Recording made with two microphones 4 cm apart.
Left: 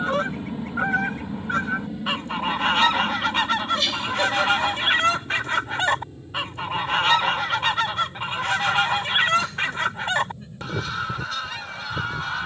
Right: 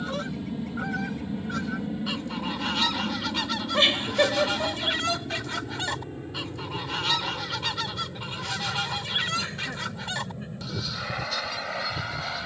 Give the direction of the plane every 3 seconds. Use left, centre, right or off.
centre, right, right, right.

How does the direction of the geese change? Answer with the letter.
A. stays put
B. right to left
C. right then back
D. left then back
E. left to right
A.